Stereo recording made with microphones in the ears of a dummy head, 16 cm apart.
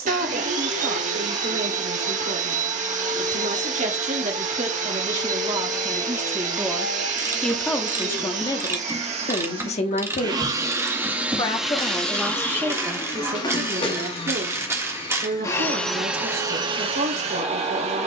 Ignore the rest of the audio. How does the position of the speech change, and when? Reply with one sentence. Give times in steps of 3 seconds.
In this clip you hear the speech on the right from 0 s, in the centre from 6 s, on the left from 9 s and on the right from 12 s.